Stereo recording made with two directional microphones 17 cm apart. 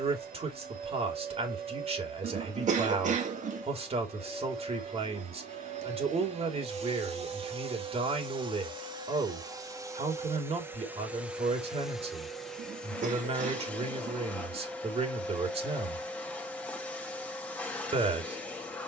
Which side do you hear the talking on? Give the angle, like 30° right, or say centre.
40° right.